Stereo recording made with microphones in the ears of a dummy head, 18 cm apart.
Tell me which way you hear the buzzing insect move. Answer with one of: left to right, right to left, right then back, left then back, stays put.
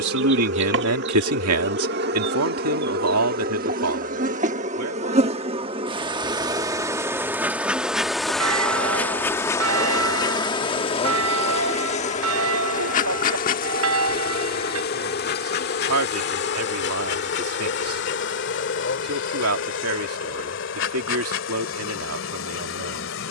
right to left.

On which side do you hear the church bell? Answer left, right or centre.
right.